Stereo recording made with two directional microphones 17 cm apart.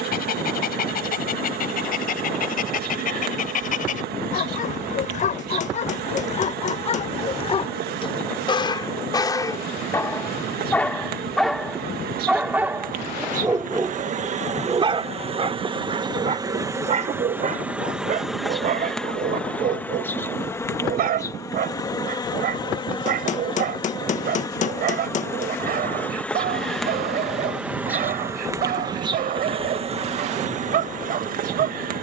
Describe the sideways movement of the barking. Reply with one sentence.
In this clip you hear the barking move to the right.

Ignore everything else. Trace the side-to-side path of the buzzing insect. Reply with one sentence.
You can hear the buzzing insect go left and come back.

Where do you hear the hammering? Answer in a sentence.
You can hear the hammering on the left.